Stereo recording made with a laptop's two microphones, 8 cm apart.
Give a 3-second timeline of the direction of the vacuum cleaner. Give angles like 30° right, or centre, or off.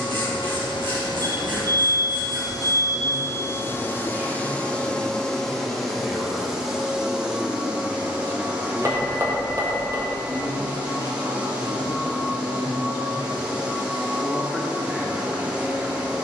60° left, 20° left, 10° right, 10° right, 10° right, 10° right.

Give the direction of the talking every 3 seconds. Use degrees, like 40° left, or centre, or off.
30° right, 20° right, centre, 50° left, 40° left, 20° right.